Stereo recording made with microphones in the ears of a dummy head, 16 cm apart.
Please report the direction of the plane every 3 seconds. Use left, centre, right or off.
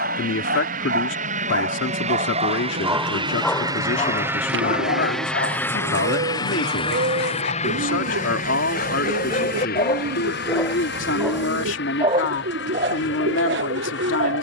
right, centre, left, left, left.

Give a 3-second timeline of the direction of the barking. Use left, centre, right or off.
right, left, left, left, right.